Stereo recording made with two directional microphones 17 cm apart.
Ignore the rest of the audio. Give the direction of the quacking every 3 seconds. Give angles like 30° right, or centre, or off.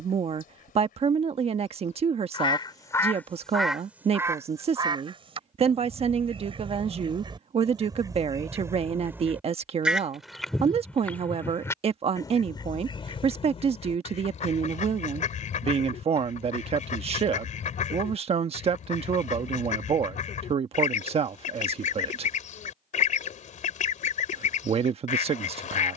50° left, 20° right, 30° right, centre, 30° left, 50° left, 50° left, 50° left, 50° left.